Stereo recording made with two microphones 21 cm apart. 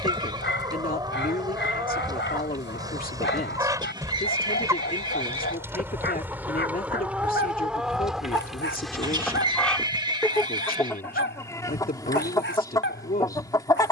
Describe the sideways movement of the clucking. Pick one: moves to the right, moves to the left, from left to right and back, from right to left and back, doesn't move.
moves to the left.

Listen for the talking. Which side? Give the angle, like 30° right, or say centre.
40° left.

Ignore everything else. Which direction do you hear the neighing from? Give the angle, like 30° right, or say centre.
20° right.